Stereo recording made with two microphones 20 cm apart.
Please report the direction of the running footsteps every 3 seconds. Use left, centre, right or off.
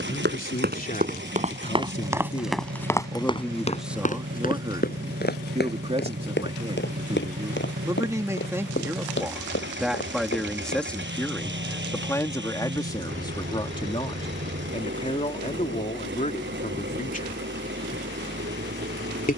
right, left, left, left, off, off, off.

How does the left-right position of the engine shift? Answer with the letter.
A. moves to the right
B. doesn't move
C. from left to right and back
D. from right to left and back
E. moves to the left
B.